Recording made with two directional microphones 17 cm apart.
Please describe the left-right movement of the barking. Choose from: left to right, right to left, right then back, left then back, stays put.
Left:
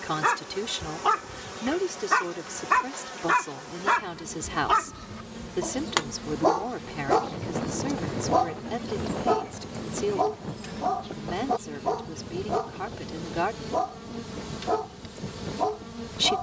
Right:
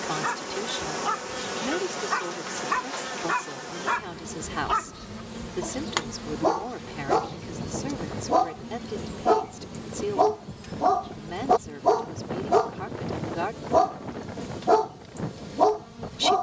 left to right.